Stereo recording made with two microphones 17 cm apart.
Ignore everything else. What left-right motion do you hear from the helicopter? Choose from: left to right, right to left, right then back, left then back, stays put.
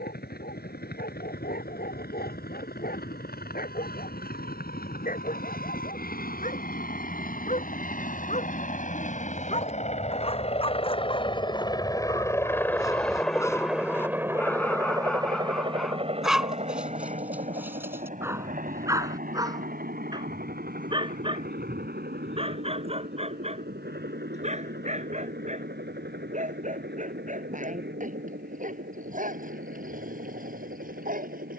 left to right.